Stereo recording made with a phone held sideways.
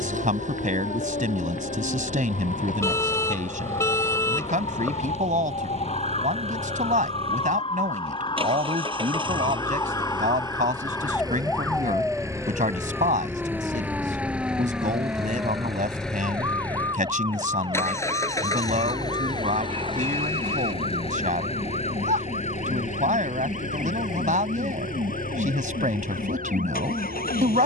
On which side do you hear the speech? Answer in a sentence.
You can hear the speech on the right.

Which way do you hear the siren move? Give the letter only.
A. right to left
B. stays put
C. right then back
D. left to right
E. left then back
D.